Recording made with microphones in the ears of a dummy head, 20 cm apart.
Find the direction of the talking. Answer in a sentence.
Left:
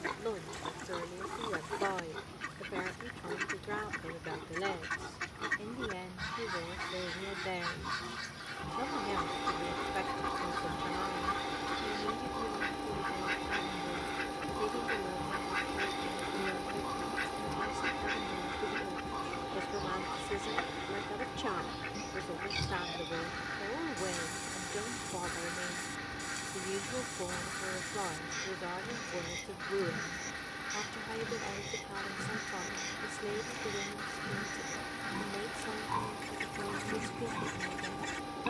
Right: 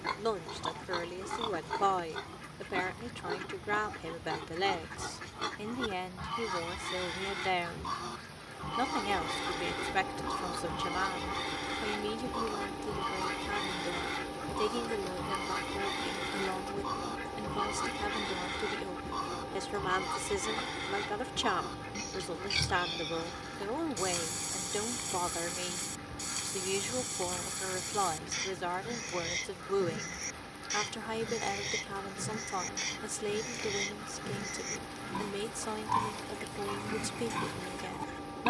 In this clip you hear the talking on the right.